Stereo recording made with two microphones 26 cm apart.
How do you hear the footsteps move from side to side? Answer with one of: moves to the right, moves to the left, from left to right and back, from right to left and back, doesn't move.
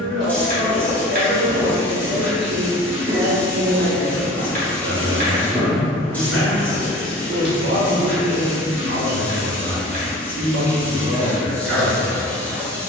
from left to right and back.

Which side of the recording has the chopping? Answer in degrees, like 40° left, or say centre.
30° right.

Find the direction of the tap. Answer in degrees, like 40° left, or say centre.
10° left.